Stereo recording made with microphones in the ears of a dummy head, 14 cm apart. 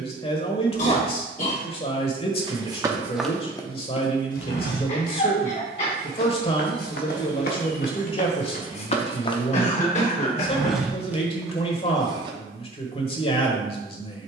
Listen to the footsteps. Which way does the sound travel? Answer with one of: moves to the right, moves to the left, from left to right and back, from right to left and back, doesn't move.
from right to left and back.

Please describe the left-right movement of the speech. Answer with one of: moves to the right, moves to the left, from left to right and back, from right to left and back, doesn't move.
doesn't move.